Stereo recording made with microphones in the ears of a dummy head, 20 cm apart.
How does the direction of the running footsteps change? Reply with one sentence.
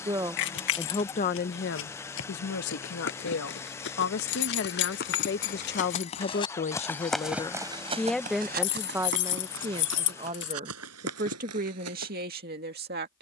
In this clip you hear the running footsteps travel towards the right.